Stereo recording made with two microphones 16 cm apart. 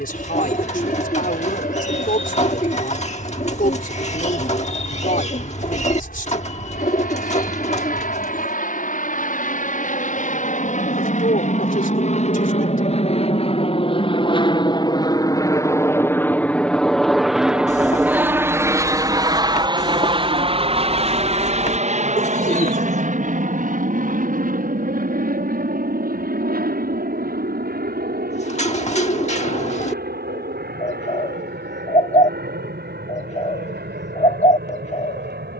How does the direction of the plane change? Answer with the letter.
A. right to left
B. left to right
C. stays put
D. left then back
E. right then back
B.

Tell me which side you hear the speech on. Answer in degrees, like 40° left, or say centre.
60° left.